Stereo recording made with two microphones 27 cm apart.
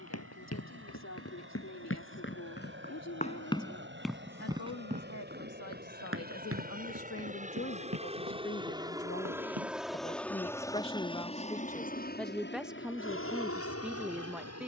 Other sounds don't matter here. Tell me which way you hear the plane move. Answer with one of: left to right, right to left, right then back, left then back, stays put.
right to left.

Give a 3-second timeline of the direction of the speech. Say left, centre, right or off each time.
left, left, left, left, centre.